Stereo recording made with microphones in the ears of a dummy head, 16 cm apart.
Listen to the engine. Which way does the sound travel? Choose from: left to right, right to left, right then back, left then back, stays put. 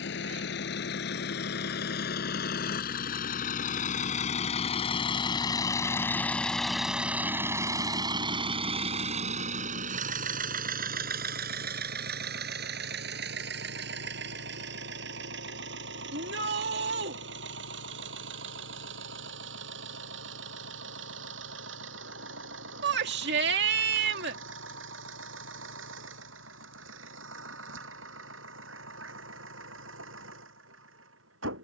left to right.